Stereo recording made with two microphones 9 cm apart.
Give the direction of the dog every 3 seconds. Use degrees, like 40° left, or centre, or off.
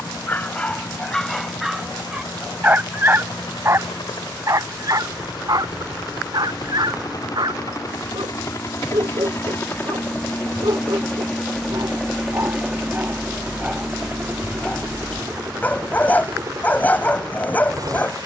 centre, 40° right, 60° right, 60° right, 20° right, 20° left.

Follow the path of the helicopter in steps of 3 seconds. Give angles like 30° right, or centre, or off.
70° left, 60° left, 50° left, 20° left, 20° right, 40° right.